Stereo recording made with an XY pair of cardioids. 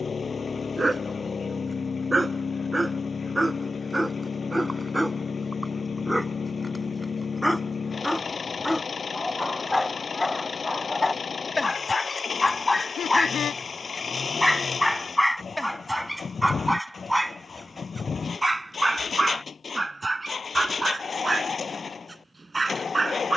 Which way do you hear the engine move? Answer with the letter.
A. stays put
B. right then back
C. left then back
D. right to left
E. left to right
A.